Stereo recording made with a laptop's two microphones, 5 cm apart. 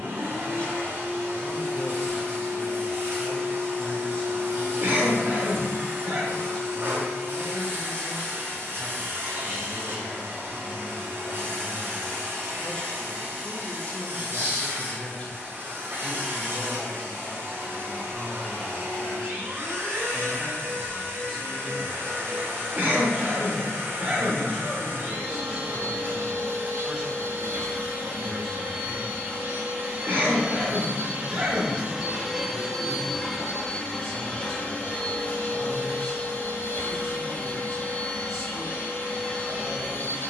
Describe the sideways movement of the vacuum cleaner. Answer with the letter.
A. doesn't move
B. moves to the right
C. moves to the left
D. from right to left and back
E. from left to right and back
C.